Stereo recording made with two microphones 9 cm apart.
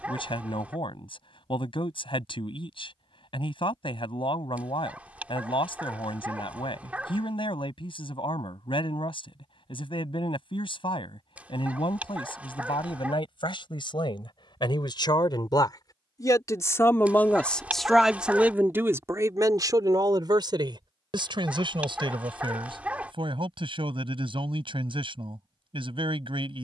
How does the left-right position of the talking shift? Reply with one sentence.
You can hear the talking travel towards the right.